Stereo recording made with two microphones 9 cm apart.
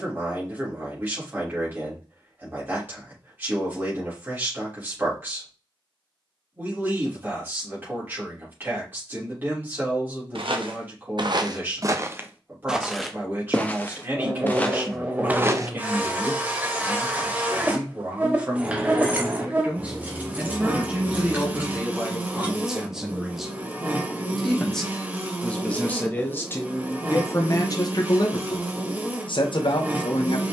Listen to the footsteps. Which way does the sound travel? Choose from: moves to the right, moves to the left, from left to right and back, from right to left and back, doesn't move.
from right to left and back.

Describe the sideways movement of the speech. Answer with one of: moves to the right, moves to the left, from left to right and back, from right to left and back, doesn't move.
moves to the left.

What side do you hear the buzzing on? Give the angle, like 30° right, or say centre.
20° right.